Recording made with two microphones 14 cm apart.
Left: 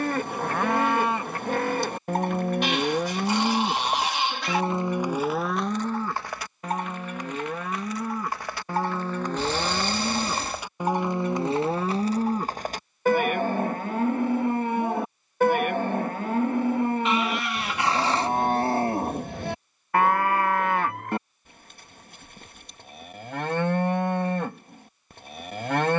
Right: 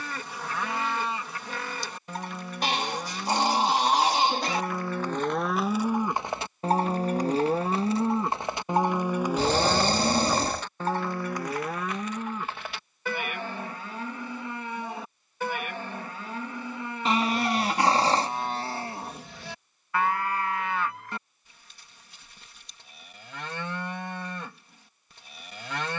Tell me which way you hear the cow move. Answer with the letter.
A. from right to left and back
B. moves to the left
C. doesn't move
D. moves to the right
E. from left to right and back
E.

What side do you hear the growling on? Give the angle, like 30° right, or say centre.
40° right.